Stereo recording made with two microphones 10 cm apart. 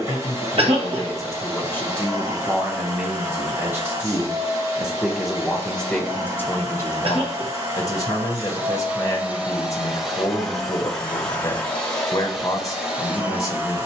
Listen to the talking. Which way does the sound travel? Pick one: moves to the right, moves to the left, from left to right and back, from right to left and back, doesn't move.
from left to right and back.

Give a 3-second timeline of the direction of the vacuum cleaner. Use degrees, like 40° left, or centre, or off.
30° right, 30° right, 30° right, centre, 10° right.